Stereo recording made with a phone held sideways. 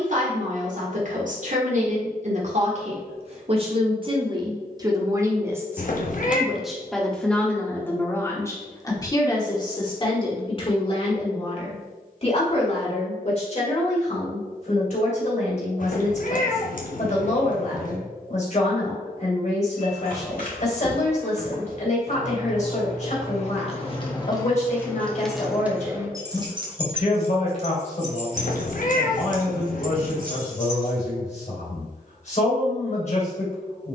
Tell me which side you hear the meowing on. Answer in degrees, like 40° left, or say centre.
60° left.